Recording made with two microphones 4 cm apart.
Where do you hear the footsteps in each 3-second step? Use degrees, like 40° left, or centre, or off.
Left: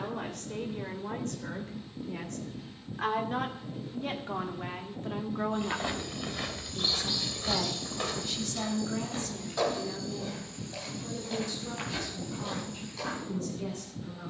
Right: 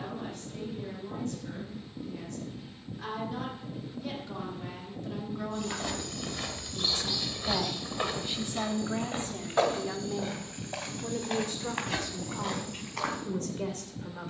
off, 20° left, 10° right, 50° right, 60° right.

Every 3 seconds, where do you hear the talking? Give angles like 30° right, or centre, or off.
60° left, 40° left, 10° right, 40° right, 60° right.